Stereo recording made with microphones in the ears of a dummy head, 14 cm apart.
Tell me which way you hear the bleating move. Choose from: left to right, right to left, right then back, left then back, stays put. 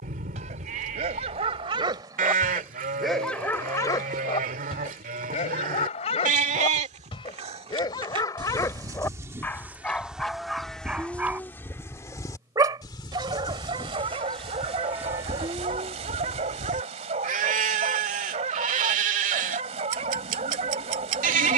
left then back.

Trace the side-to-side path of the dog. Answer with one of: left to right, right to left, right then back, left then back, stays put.
left then back.